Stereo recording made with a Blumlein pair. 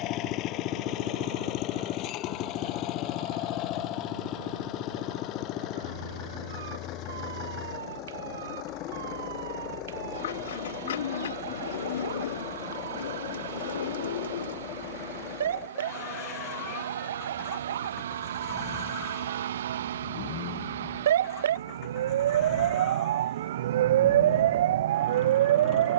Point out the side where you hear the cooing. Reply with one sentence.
In this clip you hear the cooing on the left.